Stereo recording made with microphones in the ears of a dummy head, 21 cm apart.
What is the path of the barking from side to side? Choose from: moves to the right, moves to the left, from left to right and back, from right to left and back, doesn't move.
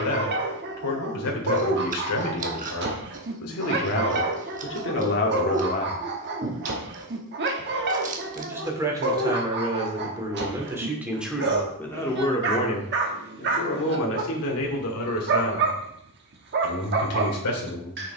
doesn't move.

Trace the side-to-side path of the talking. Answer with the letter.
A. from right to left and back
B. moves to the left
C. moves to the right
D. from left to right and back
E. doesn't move
D.